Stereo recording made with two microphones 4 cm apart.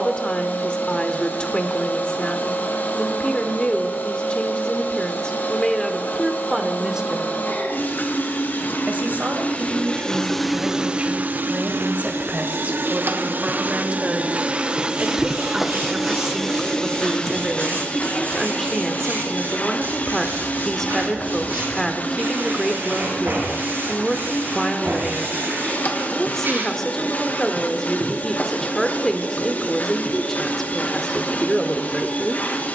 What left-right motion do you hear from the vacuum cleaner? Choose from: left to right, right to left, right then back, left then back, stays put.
right then back.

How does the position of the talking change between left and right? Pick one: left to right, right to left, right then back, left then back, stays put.
right then back.